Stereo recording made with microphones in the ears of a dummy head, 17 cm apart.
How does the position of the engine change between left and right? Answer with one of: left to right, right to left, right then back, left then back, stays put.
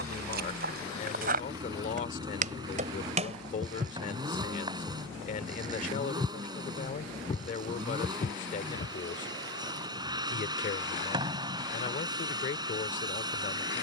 stays put.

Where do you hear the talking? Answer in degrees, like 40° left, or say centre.
40° left.